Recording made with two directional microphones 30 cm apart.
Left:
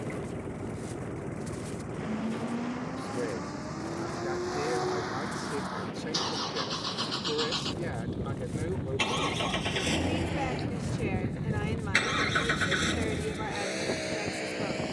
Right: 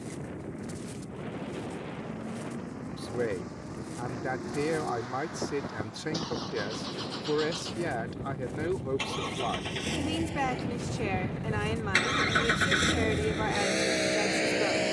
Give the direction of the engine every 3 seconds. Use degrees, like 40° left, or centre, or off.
60° left, 50° left, 40° left, 20° left, 30° right.